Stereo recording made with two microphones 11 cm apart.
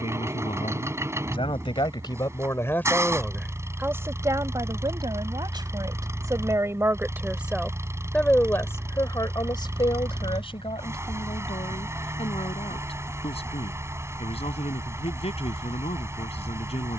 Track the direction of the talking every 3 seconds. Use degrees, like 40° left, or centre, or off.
50° left, 30° right, 10° right, 50° left, 70° left, 70° left.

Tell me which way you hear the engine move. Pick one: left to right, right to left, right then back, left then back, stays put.
stays put.